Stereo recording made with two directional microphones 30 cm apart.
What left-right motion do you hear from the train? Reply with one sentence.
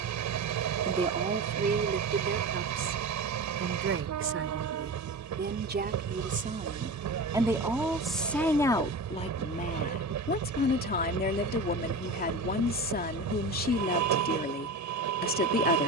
You can hear the train stay put.